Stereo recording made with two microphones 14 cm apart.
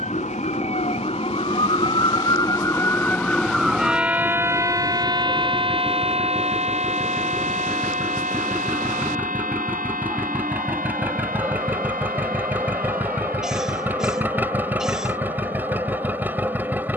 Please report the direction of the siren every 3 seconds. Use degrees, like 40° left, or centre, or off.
40° left, 20° right, 50° right, 70° right, 70° right, 80° right.